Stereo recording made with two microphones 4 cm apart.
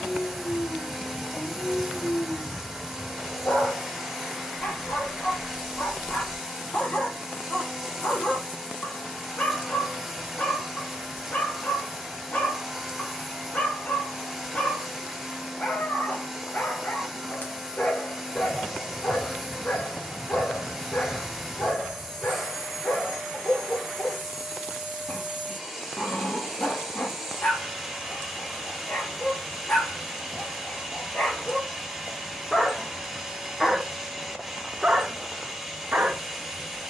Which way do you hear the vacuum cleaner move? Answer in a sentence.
In this clip you hear the vacuum cleaner stay put.